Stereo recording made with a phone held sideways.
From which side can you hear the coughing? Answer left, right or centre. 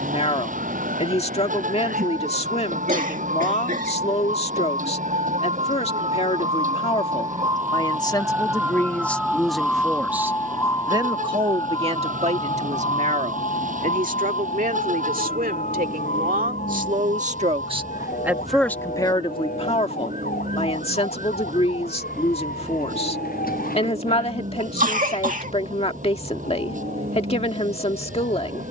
right.